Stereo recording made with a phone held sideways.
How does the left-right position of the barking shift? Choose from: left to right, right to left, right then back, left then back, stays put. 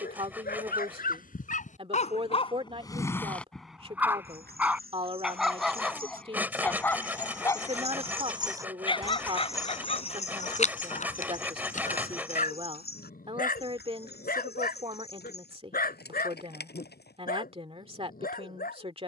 right then back.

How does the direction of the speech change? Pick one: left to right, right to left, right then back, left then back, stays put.
stays put.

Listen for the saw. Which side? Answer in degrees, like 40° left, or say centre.
10° right.